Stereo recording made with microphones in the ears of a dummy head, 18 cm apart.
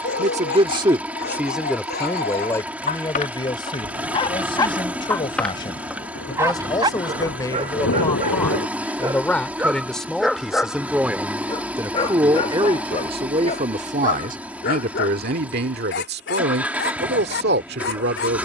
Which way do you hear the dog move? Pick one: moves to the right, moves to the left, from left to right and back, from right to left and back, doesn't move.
from left to right and back.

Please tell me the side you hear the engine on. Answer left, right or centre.
centre.